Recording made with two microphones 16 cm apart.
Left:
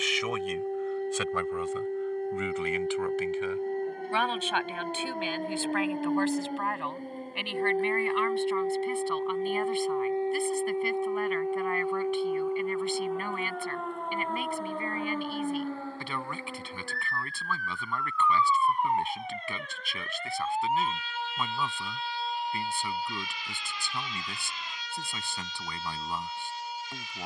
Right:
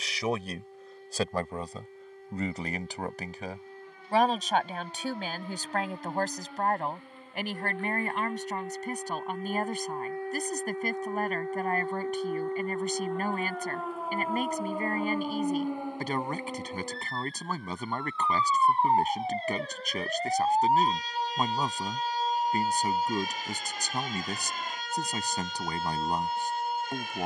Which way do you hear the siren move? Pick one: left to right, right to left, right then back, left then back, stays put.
left to right.